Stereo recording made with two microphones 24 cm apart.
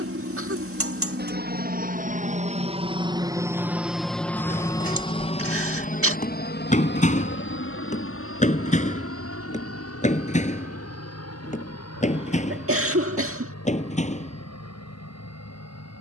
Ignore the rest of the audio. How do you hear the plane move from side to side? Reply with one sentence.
In this clip you hear the plane travel towards the left.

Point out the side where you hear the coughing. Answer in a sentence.
You can hear the coughing on the right.